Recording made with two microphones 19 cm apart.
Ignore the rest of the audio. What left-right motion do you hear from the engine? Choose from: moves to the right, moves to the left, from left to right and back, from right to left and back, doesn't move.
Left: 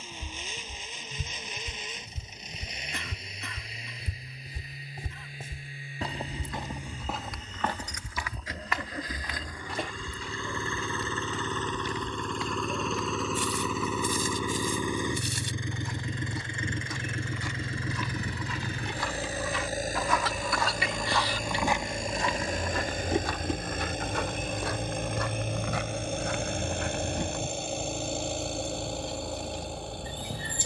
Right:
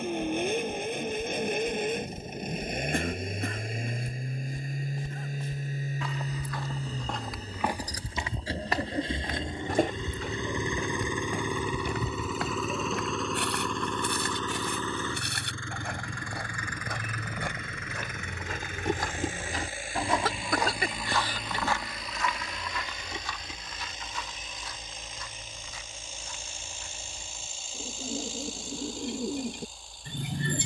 moves to the left.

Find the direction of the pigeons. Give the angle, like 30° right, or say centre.
60° right.